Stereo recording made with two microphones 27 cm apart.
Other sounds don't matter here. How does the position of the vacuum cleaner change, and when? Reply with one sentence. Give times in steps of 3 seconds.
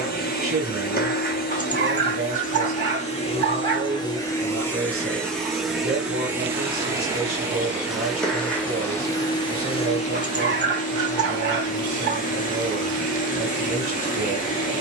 In this clip you hear the vacuum cleaner on the left from 0 s, in the centre from 3 s and on the left from 9 s.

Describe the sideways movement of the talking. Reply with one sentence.
In this clip you hear the talking stay in one place.